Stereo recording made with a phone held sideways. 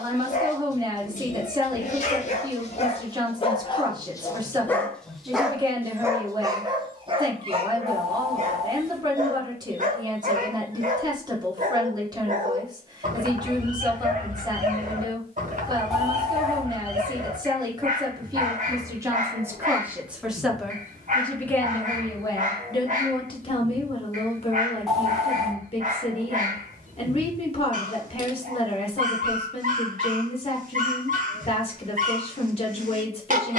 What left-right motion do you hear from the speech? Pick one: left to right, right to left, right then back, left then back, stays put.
right to left.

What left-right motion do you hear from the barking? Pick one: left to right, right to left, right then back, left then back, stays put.
left to right.